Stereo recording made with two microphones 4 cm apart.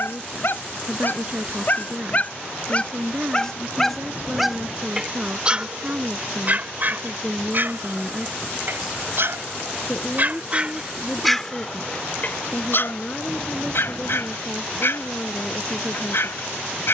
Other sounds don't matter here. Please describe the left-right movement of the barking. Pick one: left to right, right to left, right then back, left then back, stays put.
right then back.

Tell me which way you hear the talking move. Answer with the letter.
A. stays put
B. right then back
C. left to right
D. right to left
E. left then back
D.